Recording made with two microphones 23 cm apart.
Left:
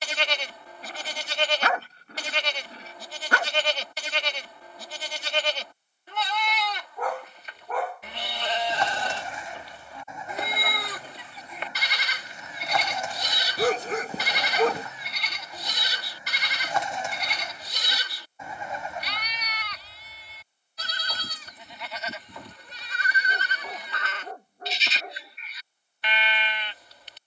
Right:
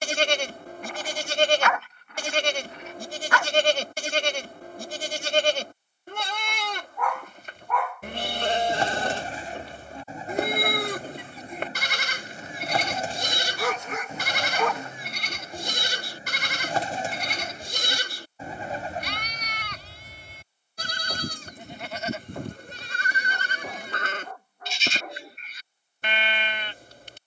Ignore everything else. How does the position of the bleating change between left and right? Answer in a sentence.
In this clip you hear the bleating stay in one place.